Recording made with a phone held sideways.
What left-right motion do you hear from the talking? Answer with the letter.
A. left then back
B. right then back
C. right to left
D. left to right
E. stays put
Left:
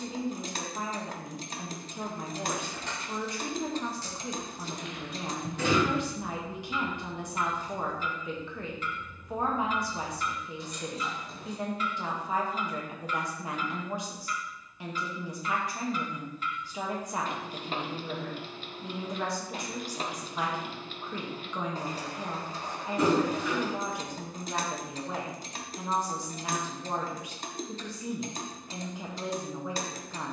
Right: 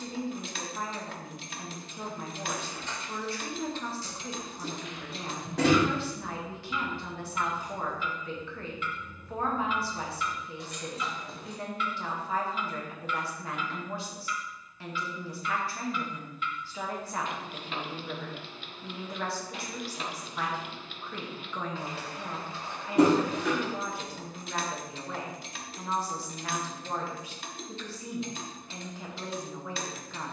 E.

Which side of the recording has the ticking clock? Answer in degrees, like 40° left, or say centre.
40° left.